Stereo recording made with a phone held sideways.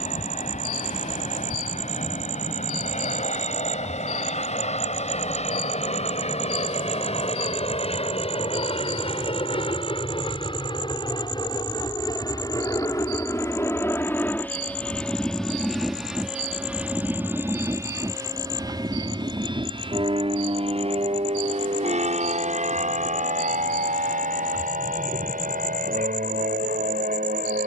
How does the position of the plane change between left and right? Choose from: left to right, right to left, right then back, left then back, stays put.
left to right.